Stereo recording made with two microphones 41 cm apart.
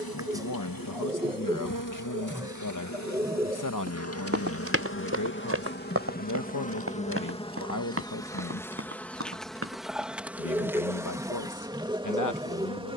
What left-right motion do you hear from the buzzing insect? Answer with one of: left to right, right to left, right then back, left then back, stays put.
left to right.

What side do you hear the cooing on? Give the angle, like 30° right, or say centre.
10° right.